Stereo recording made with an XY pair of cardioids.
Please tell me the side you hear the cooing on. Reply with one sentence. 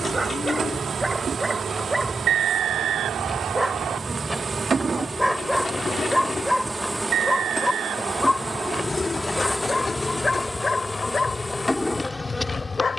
In this clip you hear the cooing on the left.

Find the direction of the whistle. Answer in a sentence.
You can hear the whistle on the right.